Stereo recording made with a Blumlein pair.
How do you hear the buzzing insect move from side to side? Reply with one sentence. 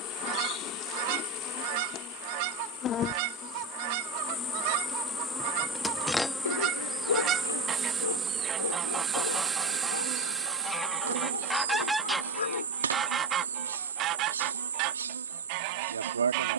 You can hear the buzzing insect move from left to right.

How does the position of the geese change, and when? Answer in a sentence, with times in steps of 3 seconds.
You can hear the geese on the right from 0 s, in the centre from 9 s and on the right from 12 s.